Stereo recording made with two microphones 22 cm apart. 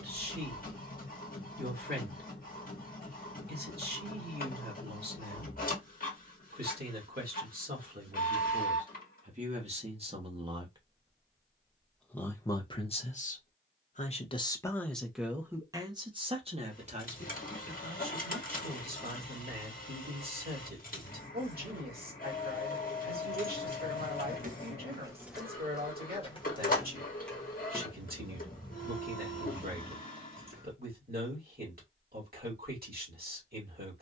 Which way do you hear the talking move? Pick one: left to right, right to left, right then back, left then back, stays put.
left then back.